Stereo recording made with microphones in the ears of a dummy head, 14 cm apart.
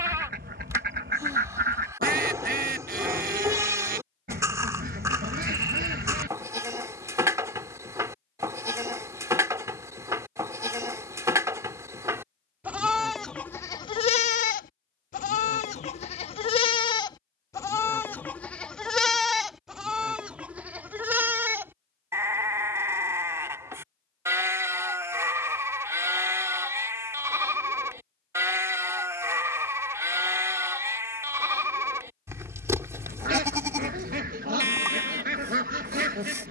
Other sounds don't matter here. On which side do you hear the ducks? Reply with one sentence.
In this clip you hear the ducks on the right.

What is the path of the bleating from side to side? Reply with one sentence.
You can hear the bleating move from right to left and back again.